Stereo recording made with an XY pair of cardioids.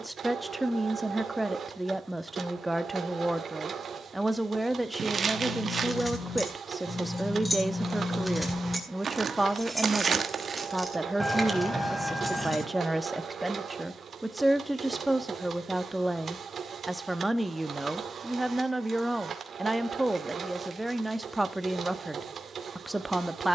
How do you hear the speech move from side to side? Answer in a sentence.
In this clip you hear the speech stay put.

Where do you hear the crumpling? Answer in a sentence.
In this clip you hear the crumpling on the right.